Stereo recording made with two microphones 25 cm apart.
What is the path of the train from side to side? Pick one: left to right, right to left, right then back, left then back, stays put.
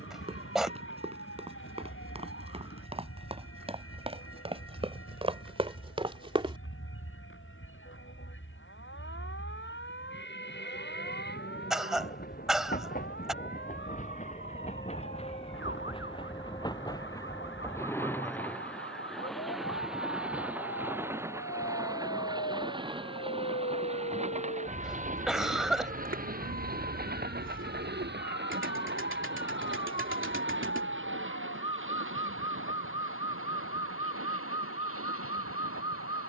left to right.